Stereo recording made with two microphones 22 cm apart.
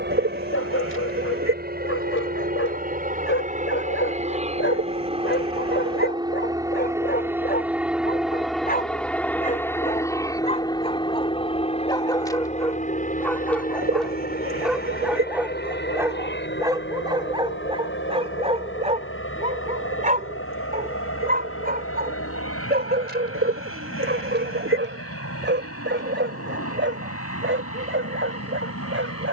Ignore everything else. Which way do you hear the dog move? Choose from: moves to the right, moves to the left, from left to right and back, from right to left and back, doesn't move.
moves to the right.